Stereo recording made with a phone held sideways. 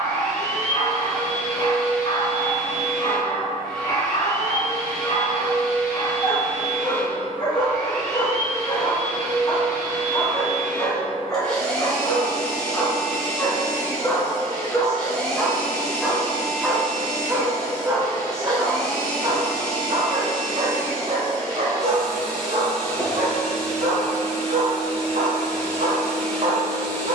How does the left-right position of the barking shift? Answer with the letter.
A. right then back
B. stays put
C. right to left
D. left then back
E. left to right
E.